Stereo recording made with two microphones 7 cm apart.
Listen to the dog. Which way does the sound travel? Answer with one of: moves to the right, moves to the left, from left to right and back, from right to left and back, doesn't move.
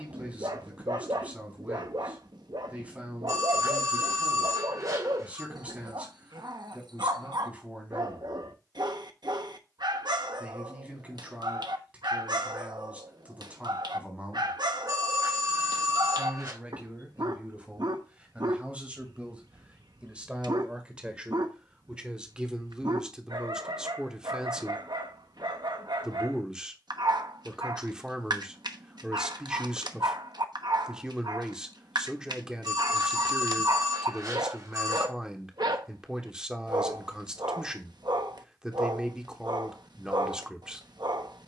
doesn't move.